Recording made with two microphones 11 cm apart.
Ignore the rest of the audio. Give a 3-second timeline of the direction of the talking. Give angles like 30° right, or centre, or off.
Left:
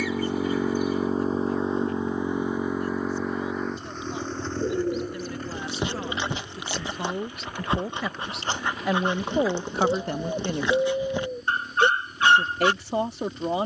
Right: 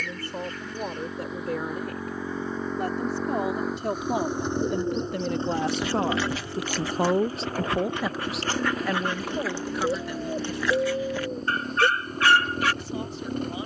80° right, 60° right, 30° right, 40° left, 70° left.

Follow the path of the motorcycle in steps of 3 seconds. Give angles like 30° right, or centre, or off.
30° left, 10° right, 40° right, 50° right, 50° right.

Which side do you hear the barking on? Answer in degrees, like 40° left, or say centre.
20° left.